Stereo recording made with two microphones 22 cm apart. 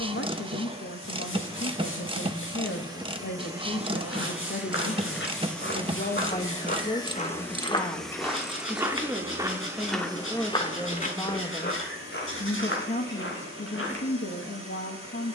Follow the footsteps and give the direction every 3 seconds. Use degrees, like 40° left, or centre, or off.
off, 60° left, 20° left, 20° left, 60° left.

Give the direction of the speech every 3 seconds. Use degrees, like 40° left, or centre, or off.
60° left, 50° left, 20° left, 10° left, 50° left.